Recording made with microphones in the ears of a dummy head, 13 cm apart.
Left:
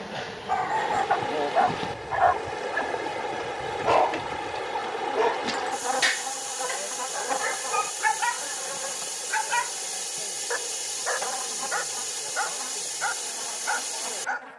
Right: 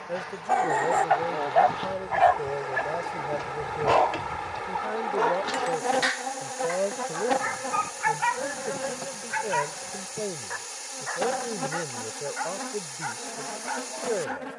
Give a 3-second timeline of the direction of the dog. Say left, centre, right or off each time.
right, centre, left, left, left.